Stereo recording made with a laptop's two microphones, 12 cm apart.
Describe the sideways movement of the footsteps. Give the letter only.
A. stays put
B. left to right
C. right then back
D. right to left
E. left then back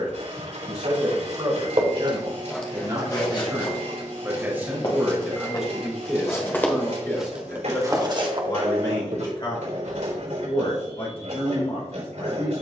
E.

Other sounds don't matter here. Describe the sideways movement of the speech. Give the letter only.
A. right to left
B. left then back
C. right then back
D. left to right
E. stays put
A.